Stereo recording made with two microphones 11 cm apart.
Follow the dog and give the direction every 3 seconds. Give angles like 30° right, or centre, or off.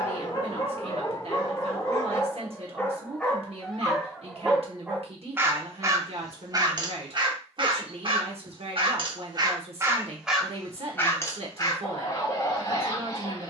30° left, 10° right, 50° right, centre, 30° left.